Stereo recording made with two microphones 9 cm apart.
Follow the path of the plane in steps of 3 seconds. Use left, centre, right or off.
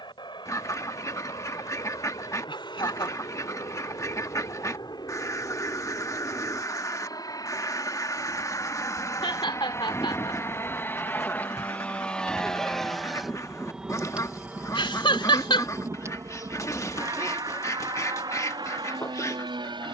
left, left, left, left, centre, right, right.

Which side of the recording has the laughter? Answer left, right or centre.
left.